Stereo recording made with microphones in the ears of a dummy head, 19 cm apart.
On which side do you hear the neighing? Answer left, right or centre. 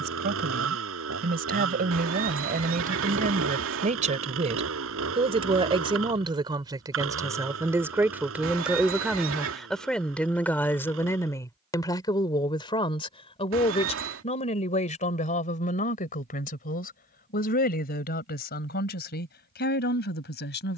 right.